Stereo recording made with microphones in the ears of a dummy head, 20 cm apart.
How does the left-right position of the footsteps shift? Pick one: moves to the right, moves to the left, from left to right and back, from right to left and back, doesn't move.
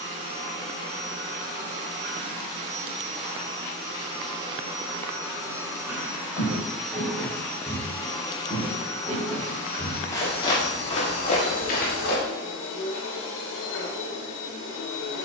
moves to the left.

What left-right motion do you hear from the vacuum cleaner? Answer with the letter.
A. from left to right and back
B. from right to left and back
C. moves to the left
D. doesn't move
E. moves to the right
C.